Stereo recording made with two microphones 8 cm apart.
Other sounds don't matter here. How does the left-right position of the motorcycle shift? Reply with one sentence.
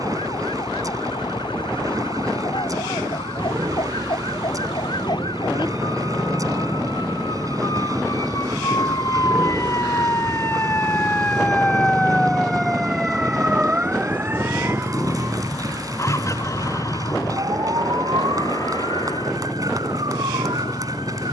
In this clip you hear the motorcycle go from the right side to the left.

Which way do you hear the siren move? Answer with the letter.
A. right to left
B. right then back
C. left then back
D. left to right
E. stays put
D.